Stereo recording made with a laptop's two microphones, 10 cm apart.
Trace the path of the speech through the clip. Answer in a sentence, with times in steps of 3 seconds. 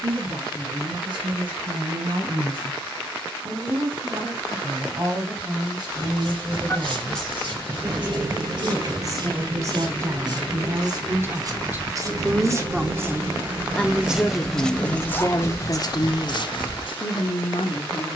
You can hear the speech on the right from 0 s, in the centre from 12 s and on the left from 15 s.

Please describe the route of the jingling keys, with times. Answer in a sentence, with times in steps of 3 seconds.
You can hear the jingling keys not at all from 0 s, on the right from 6 s and on the left from 15 s.